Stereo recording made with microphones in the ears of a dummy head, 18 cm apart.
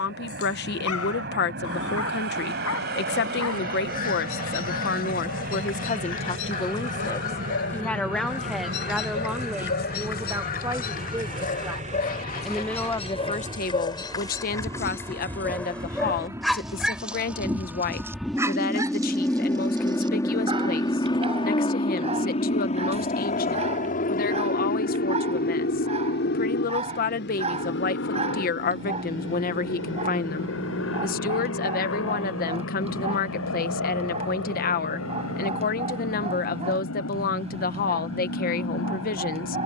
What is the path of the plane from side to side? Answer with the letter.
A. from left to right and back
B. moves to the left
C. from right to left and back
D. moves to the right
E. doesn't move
B.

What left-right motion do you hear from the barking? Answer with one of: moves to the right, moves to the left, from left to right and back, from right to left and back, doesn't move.
moves to the right.